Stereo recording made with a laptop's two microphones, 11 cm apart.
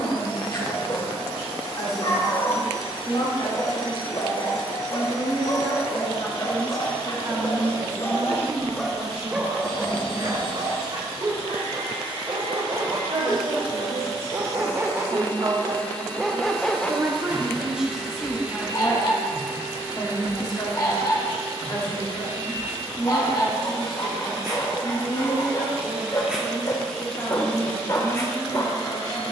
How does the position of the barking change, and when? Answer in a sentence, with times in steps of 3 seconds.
You can hear the barking on the left from 0 s, on the right from 9 s, in the centre from 15 s and on the left from 18 s.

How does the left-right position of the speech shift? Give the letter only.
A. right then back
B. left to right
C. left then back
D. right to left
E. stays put
A.